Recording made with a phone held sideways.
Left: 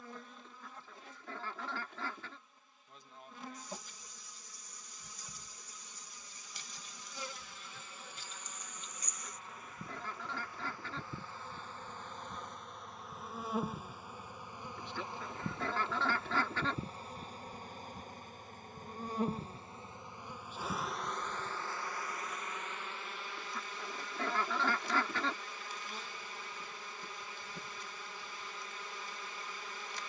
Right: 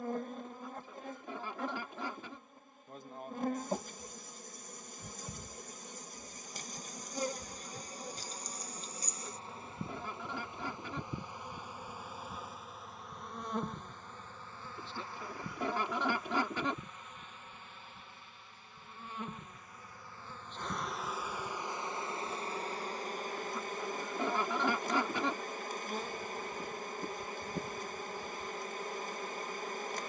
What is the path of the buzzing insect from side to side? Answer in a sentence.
You can hear the buzzing insect go left and come back.